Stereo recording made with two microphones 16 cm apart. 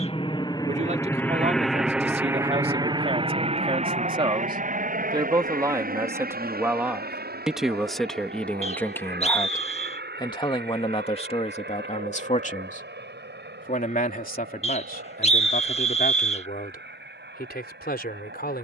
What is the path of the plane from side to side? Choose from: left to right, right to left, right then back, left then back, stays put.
left to right.